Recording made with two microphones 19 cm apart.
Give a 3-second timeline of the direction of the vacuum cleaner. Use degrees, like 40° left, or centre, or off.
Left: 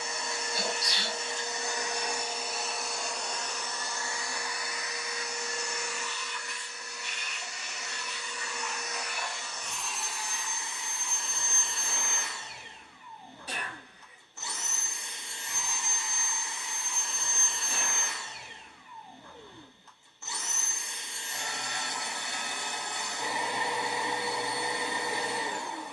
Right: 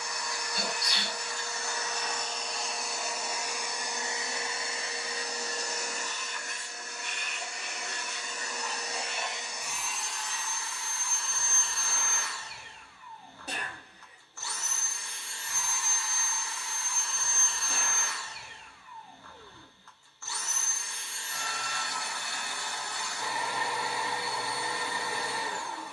10° left, 20° right, 50° right, 10° left, 20° left, 20° left, 20° left, 20° left, 20° left.